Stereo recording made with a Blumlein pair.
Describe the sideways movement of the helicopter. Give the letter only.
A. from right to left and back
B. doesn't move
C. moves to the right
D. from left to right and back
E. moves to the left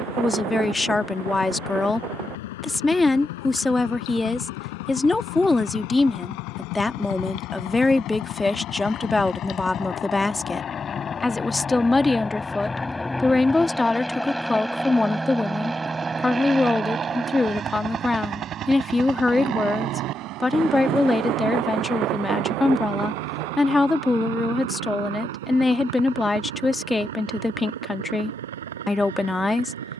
C.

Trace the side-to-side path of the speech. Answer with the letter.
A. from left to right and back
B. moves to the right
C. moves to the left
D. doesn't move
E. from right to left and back
D.